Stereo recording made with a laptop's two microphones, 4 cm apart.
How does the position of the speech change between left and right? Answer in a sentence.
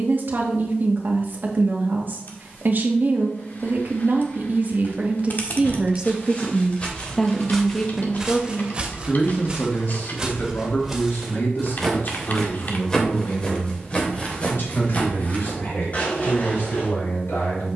In this clip you hear the speech travel towards the left.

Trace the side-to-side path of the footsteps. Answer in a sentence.
You can hear the footsteps go right and come back.